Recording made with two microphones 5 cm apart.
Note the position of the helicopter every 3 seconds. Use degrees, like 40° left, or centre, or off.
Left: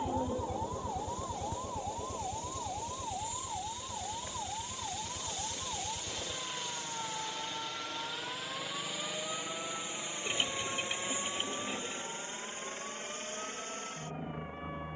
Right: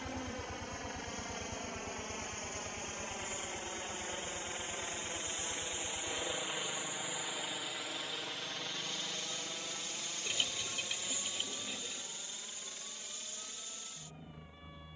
50° right, 30° right, 10° right, 20° left, 40° left.